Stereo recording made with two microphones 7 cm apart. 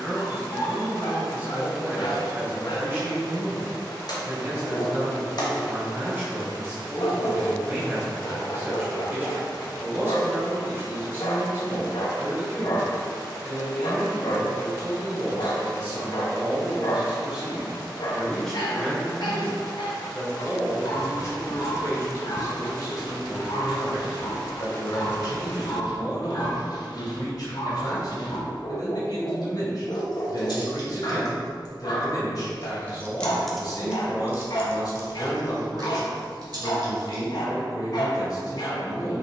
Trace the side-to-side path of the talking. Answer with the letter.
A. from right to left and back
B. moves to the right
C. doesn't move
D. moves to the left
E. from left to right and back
D.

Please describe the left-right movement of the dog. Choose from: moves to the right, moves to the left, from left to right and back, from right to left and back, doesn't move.
doesn't move.